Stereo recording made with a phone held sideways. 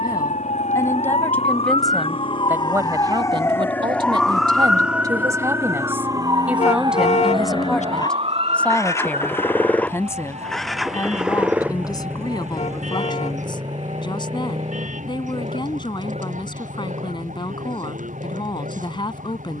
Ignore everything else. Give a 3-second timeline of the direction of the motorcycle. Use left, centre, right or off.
left, left, left, centre, right, right, right.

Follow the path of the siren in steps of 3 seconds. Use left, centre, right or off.
left, centre, right, right, right, right, right.